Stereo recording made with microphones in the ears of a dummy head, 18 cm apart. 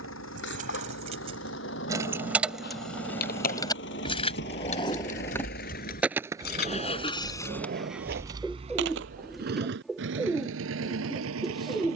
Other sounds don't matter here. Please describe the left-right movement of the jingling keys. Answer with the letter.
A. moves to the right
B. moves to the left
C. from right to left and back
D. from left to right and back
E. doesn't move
B.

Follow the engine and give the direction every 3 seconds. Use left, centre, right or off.
left, left, centre, right.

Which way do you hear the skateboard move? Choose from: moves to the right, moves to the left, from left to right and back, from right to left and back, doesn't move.
moves to the right.